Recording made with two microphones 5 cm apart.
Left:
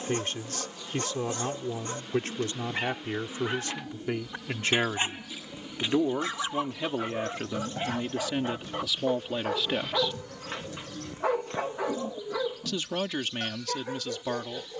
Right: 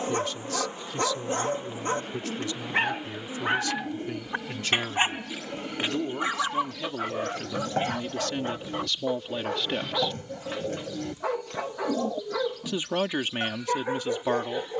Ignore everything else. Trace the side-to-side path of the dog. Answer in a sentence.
You can hear the dog move from right to left and back again.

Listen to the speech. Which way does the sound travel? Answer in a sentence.
You can hear the speech travel towards the right.